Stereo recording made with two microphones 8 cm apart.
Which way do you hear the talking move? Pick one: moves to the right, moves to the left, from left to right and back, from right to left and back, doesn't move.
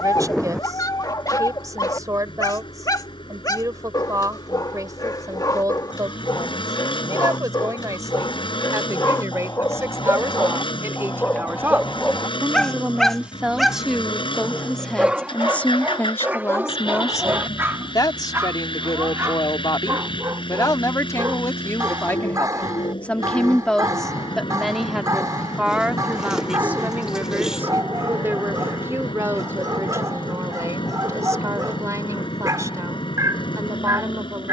from right to left and back.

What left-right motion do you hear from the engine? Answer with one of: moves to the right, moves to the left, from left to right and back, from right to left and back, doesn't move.
doesn't move.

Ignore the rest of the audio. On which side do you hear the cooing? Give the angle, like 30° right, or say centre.
10° right.